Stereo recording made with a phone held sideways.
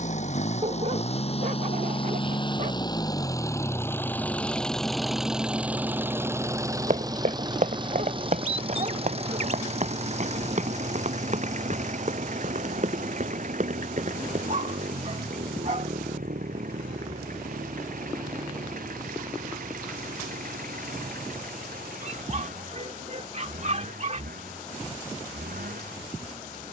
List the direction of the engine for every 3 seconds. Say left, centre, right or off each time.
left, centre, right, right, right, right, right, right, right.